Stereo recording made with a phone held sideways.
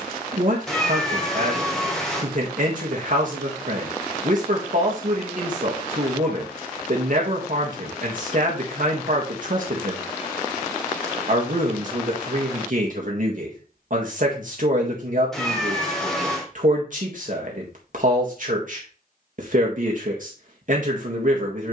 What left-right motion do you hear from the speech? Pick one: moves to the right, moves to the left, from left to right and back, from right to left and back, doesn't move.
doesn't move.